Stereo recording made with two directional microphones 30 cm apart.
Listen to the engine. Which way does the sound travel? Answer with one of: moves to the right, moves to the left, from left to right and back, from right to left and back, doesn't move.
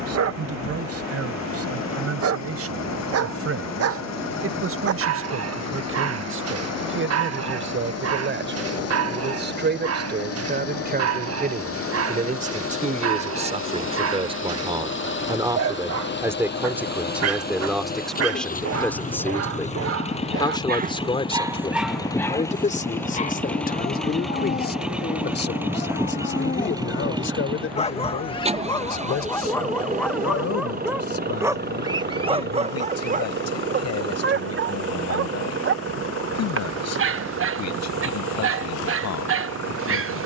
moves to the right.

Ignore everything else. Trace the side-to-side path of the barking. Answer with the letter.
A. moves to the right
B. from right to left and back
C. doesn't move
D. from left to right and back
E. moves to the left
B.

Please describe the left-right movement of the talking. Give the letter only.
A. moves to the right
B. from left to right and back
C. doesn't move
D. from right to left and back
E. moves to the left
E.